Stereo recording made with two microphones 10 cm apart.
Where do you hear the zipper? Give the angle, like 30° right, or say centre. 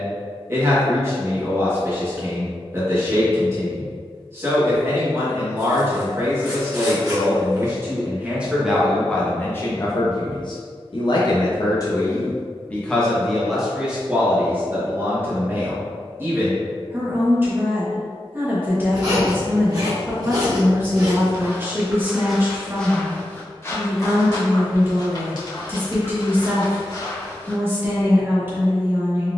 40° right.